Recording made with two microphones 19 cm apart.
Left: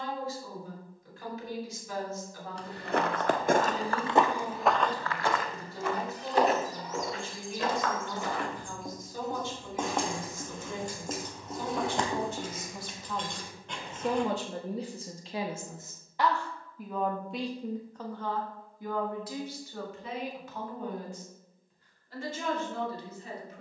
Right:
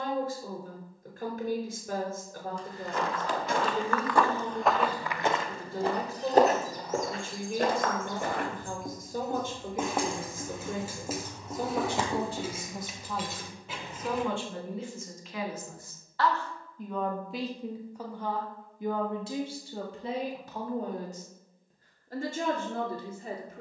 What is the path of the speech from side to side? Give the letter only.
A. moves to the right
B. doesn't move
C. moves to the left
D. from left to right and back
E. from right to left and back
E.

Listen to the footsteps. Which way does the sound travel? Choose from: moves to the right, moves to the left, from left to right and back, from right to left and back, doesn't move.
moves to the right.